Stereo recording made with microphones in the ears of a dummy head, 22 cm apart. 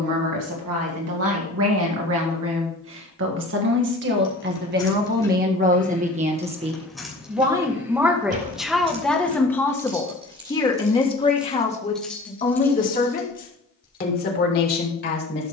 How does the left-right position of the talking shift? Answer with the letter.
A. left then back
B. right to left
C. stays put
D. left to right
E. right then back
B.